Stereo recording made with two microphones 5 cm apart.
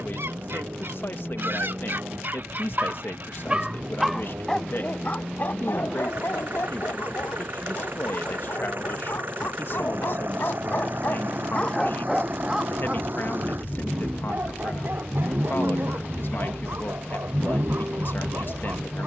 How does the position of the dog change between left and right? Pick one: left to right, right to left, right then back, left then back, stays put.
left then back.